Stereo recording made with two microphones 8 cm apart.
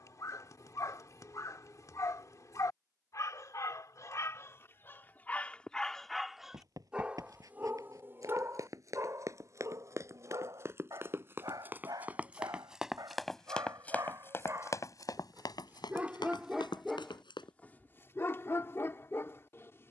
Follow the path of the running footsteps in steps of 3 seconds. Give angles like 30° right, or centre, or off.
off, off, 50° right, 40° right, 10° left, 70° left, off.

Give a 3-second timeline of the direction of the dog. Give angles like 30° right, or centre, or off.
50° left, 30° left, 20° right, 50° right, 50° right, 10° right, 30° left.